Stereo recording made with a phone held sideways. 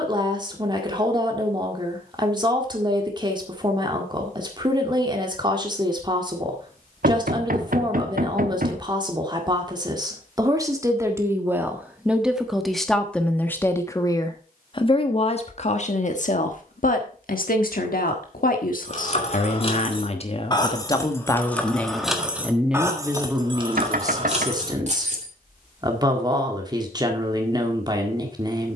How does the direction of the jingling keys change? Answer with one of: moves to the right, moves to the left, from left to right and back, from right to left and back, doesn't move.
moves to the right.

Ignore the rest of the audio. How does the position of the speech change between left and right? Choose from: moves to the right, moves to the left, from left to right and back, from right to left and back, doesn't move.
from right to left and back.